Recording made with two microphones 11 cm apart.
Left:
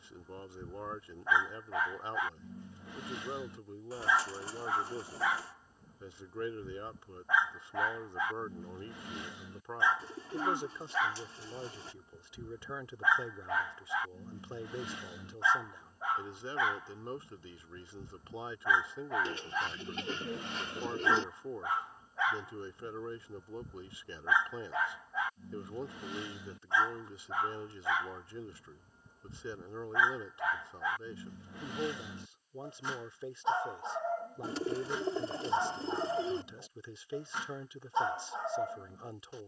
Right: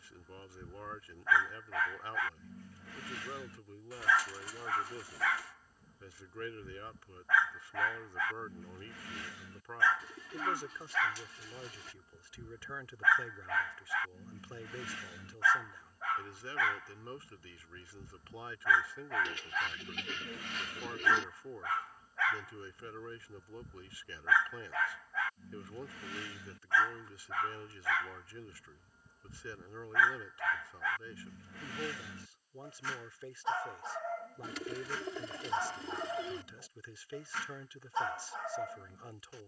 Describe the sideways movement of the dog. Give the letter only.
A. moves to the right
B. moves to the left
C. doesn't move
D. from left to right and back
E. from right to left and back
C.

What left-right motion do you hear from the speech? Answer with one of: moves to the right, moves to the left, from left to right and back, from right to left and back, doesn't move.
doesn't move.